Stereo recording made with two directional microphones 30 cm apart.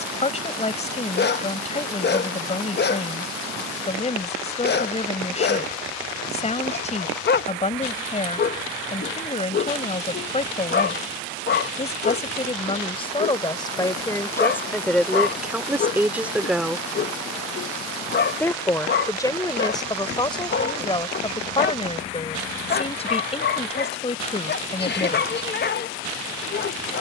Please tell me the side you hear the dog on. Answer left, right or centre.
left.